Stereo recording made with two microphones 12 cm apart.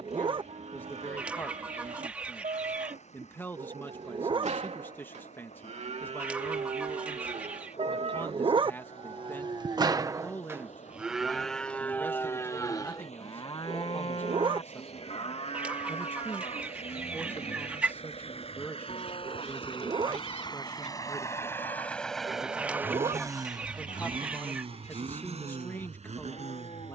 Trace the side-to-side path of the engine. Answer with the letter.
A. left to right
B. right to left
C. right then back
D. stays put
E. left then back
A.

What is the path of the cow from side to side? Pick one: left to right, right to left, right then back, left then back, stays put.
right to left.